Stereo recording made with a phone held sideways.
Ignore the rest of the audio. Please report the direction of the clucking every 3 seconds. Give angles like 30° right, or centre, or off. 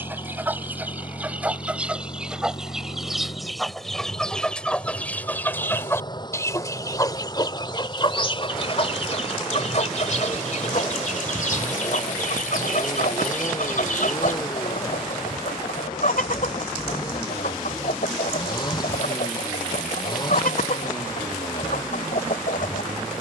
10° right, 10° left, 30° left, 60° left, 70° left, 70° left, 70° left, 70° left.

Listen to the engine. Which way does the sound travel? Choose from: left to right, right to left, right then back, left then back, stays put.
stays put.